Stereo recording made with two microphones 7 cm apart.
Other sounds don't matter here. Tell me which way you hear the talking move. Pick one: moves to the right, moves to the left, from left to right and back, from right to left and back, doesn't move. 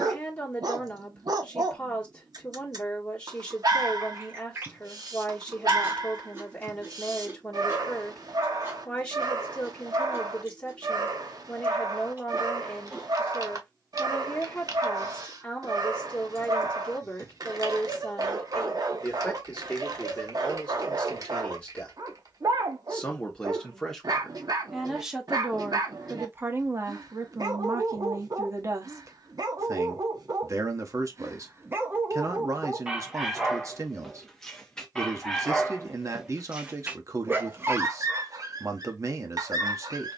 moves to the right.